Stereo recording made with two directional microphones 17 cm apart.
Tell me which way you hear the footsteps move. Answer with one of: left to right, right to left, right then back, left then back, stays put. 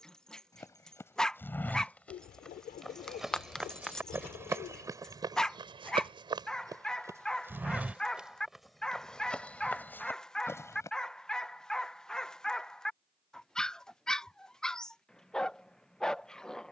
right then back.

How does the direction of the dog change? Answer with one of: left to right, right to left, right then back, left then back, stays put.
stays put.